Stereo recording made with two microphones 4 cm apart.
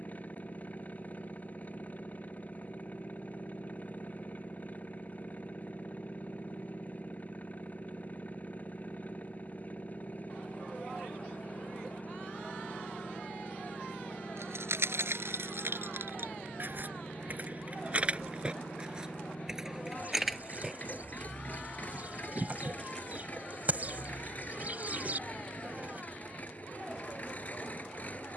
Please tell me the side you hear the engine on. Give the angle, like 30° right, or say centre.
40° left.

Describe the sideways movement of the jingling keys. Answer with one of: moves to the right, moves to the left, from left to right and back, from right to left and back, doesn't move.
moves to the left.